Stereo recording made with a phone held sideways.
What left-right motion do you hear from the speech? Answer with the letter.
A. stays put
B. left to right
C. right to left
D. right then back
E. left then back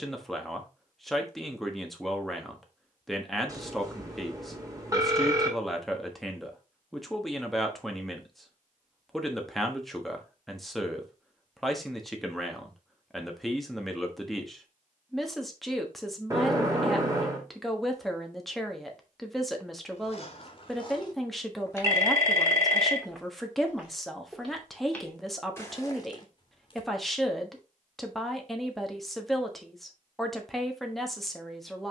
A.